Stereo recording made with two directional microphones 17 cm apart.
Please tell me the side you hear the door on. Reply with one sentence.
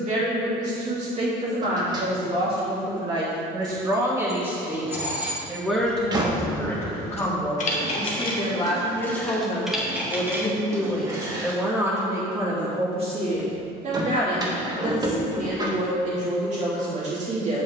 You can hear the door on the right.